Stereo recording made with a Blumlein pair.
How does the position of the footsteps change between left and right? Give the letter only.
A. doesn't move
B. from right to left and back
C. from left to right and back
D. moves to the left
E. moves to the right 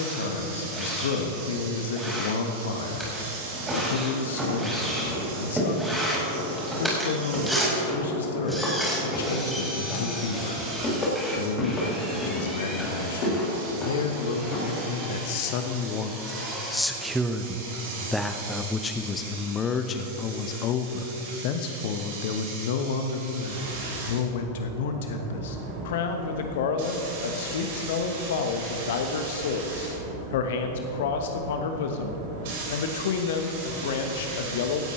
D.